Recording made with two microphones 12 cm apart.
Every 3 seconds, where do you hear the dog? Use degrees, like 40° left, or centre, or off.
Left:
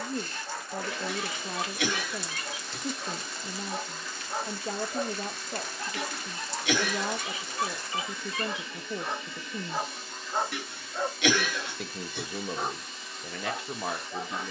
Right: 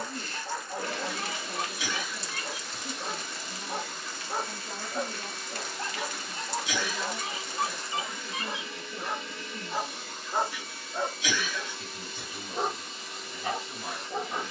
40° right, 40° right, 30° right, 10° right, 40° right.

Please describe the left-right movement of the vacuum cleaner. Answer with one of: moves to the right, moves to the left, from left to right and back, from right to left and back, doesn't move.
doesn't move.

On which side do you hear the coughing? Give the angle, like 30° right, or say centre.
60° left.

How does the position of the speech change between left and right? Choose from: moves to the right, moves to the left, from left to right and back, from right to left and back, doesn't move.
doesn't move.